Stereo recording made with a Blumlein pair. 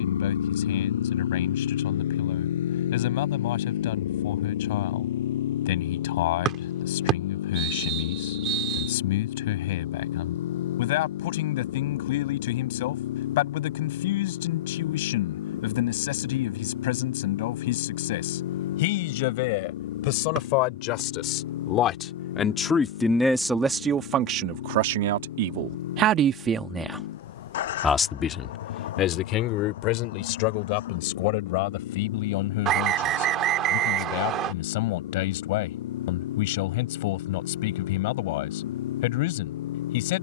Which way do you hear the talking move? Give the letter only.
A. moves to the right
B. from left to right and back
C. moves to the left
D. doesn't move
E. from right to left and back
B.